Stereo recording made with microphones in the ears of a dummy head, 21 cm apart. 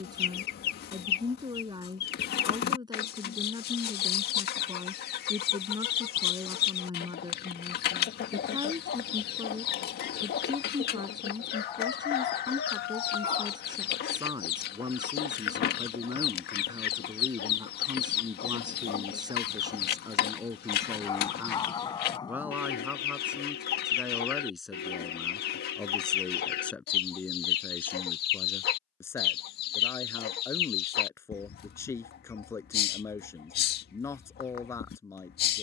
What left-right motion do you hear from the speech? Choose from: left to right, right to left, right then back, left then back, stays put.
right to left.